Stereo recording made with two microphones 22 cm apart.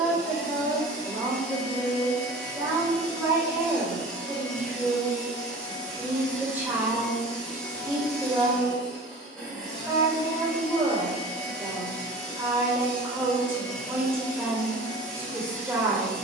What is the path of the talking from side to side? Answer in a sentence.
In this clip you hear the talking stay put.